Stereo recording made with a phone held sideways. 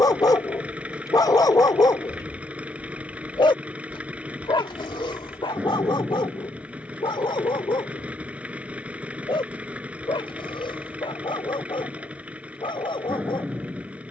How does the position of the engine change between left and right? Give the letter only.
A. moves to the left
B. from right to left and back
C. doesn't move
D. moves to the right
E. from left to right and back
C.